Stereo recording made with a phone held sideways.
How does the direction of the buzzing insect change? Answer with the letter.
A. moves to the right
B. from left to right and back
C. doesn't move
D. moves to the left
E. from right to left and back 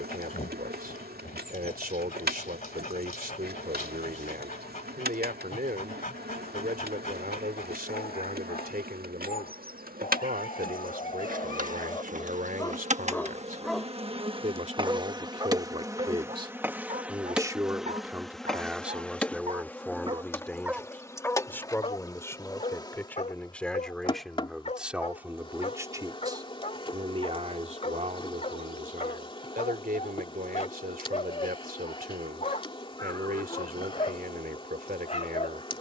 D.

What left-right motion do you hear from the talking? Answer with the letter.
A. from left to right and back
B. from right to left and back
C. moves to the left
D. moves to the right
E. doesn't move
B.